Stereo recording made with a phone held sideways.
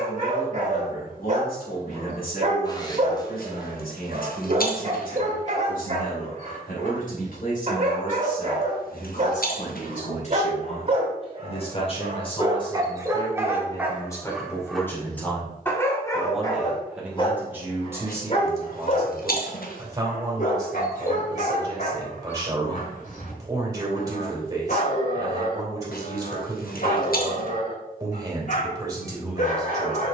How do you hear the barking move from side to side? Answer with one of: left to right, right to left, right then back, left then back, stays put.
right to left.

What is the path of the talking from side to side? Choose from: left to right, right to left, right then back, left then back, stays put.
left to right.